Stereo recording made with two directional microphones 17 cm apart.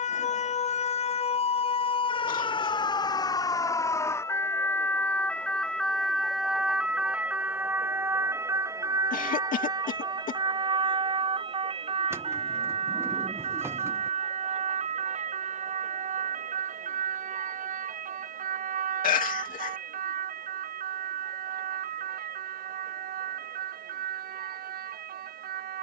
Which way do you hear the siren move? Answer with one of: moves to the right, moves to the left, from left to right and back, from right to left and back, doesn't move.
moves to the right.